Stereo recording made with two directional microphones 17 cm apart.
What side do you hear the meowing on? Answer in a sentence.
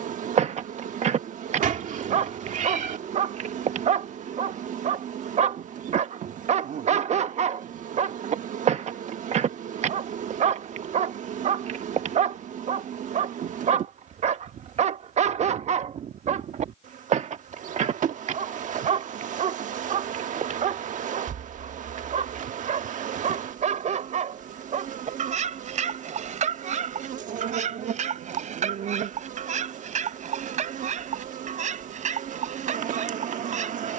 In this clip you hear the meowing on the right.